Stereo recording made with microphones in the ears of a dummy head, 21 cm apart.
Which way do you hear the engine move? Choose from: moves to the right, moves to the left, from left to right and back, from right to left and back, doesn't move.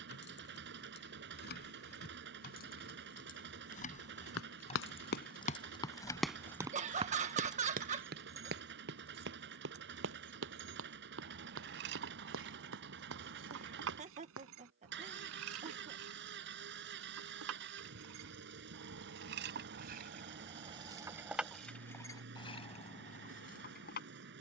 doesn't move.